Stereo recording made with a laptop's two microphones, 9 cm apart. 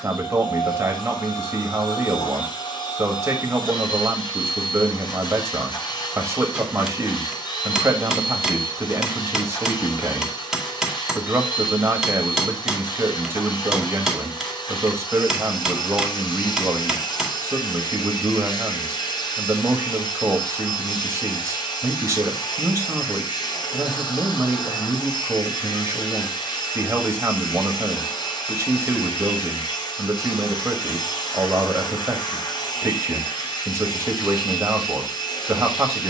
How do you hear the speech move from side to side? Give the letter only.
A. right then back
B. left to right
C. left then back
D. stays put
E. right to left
D.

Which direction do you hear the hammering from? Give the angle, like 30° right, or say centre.
centre.